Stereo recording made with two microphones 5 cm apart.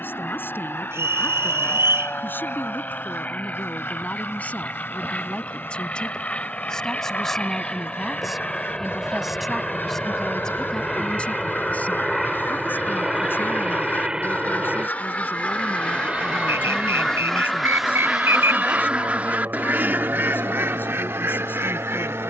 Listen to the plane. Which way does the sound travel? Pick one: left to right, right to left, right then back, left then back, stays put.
left to right.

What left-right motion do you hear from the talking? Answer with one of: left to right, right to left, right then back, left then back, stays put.
right then back.